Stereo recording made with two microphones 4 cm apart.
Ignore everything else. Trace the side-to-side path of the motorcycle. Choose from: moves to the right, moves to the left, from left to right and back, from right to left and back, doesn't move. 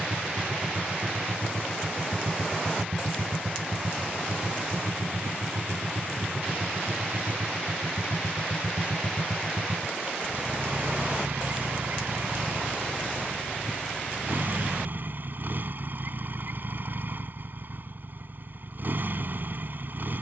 doesn't move.